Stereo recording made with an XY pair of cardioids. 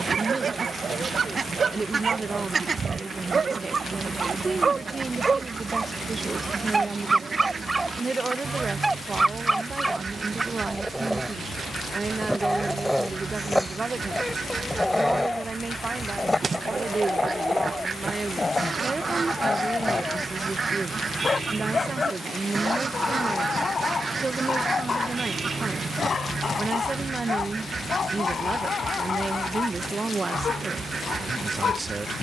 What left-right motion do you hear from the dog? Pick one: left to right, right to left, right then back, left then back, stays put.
right to left.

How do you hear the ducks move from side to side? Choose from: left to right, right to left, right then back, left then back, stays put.
stays put.